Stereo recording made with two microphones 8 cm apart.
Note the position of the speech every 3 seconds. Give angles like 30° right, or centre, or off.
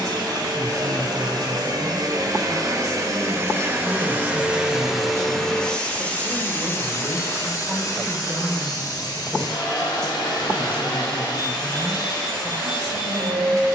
40° right, 40° right, 20° right, centre, 40° right.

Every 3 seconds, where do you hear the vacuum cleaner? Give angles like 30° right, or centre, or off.
50° right, 10° right, 40° left, 60° left, 60° left.